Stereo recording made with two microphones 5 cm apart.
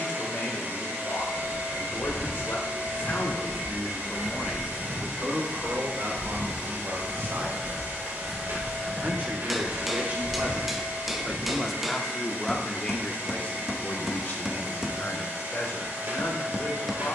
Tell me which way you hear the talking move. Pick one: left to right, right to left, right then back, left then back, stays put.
right then back.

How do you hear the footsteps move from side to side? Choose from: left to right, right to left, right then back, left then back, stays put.
right then back.